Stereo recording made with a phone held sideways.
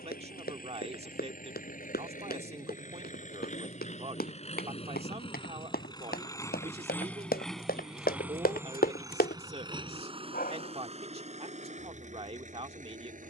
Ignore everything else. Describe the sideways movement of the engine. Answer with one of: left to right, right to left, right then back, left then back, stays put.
left to right.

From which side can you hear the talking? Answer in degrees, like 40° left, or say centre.
40° right.